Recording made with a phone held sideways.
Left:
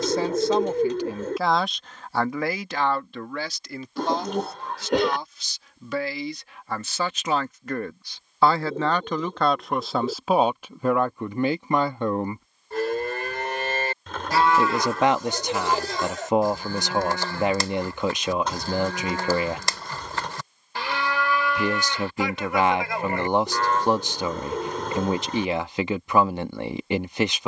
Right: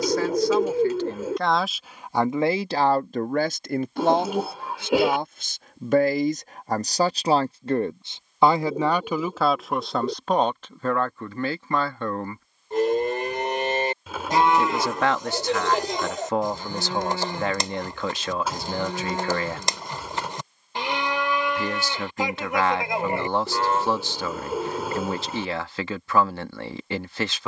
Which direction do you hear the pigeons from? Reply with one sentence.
In this clip you hear the pigeons in the centre.